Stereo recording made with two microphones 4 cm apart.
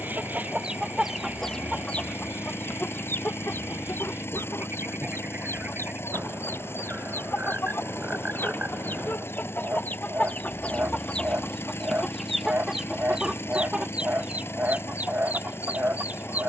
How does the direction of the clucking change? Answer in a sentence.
You can hear the clucking move from right to left and back again.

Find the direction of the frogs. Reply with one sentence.
You can hear the frogs on the right.